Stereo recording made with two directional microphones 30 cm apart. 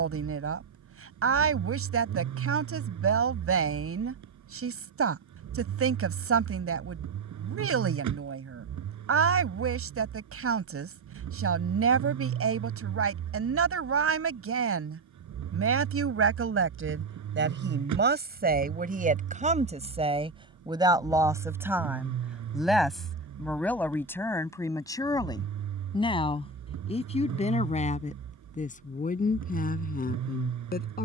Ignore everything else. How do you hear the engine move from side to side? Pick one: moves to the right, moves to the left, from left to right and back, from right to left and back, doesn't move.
doesn't move.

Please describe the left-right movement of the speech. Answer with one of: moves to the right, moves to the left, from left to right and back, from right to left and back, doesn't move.
moves to the left.